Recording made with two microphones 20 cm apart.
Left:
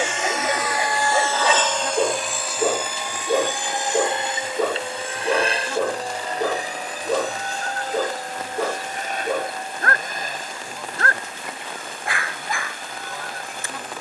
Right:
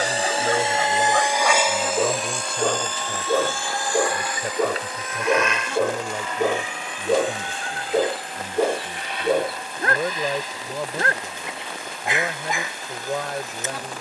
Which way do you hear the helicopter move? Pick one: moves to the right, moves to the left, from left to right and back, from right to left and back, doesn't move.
moves to the left.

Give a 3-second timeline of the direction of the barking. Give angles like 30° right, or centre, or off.
10° left, centre, 20° right, 20° right, 20° right.